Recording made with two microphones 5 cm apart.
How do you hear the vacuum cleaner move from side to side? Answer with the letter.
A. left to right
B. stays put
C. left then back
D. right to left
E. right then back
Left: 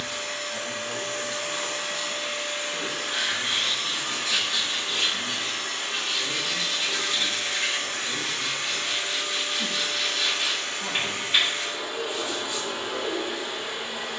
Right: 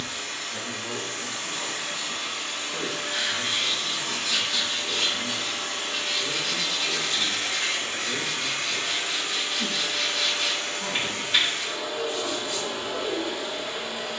E.